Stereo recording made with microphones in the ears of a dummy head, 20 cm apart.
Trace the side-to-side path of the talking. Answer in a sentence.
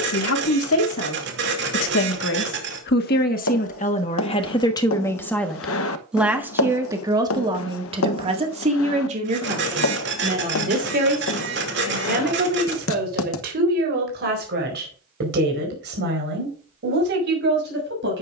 In this clip you hear the talking travel towards the right.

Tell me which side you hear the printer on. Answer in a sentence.
In this clip you hear the printer on the right.